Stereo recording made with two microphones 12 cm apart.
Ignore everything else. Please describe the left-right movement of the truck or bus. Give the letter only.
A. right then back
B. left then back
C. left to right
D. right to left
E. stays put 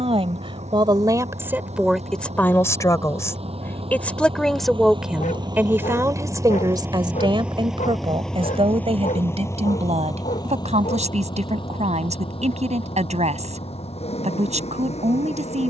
D.